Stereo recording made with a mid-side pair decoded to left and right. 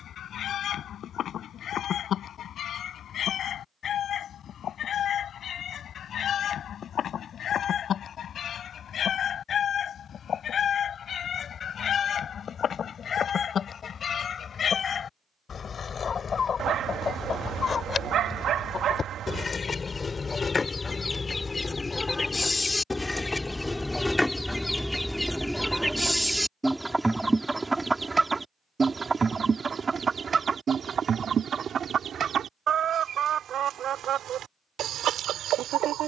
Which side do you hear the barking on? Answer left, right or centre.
right.